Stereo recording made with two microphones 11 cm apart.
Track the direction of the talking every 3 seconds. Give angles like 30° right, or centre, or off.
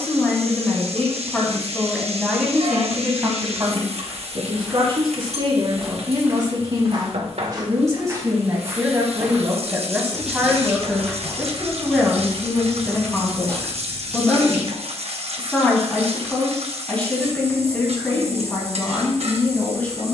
10° left, 40° right, 30° right, 10° right, 10° left, 10° left, 10° left.